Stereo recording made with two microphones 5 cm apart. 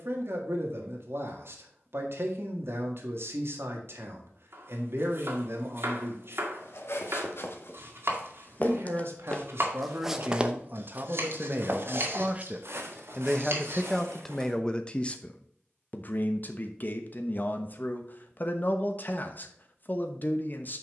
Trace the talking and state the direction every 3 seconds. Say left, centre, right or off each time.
right, right, right, right, centre, left, left.